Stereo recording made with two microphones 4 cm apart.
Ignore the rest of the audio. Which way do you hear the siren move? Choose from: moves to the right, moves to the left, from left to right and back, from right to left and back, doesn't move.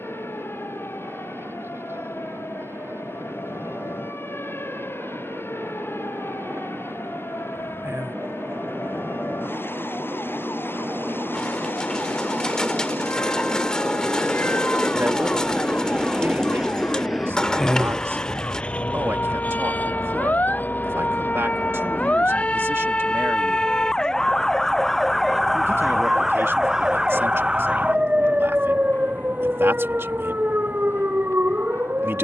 moves to the right.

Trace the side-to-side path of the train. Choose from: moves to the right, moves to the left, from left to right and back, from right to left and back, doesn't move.
moves to the left.